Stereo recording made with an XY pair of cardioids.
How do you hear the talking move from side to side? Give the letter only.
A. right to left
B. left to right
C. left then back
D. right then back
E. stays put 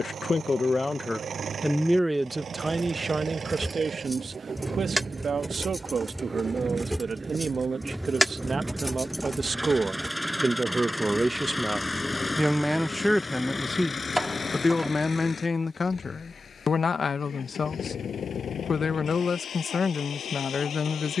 D.